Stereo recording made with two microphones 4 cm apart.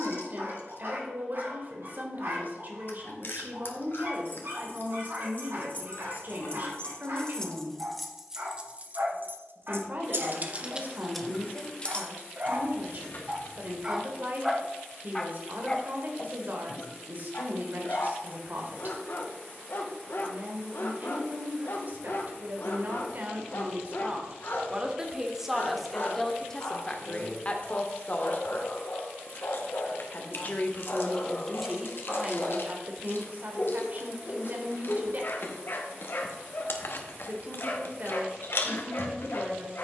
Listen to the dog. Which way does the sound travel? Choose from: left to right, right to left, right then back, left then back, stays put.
right to left.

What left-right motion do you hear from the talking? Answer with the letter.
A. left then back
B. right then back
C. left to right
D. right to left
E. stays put
A.